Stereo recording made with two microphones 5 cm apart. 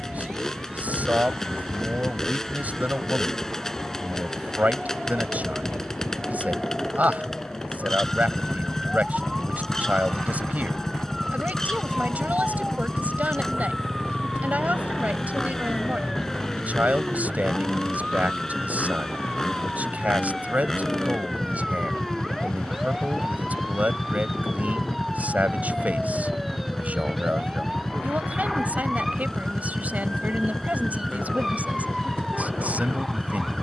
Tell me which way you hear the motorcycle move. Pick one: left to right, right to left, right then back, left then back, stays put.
stays put.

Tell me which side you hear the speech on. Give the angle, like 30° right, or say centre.
30° right.